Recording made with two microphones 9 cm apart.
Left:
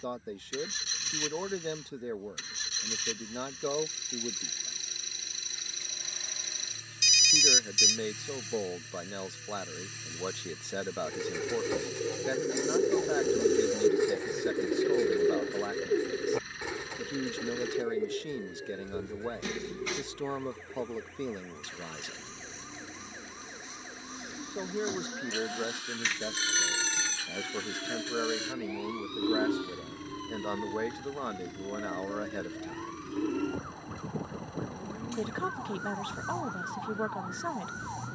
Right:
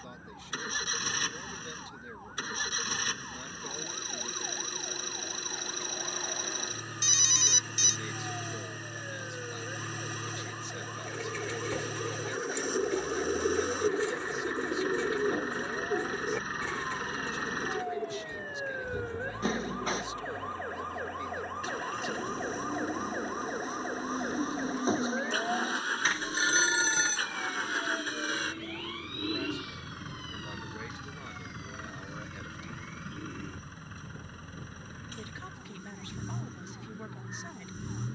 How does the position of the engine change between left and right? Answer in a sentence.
In this clip you hear the engine stay in one place.